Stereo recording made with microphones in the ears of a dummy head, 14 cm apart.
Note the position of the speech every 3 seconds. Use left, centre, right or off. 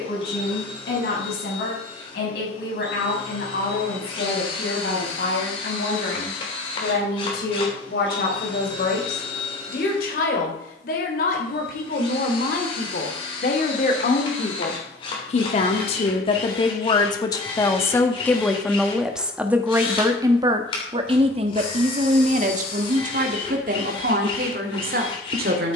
left, left, left, left, left, left, centre, right, right.